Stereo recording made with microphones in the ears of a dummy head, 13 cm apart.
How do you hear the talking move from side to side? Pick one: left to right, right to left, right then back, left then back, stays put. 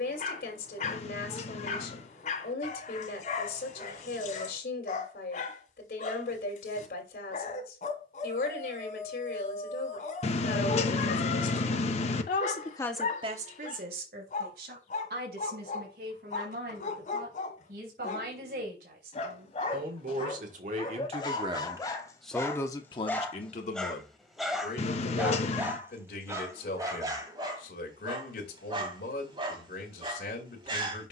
right then back.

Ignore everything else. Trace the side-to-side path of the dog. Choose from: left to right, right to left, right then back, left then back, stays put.
left to right.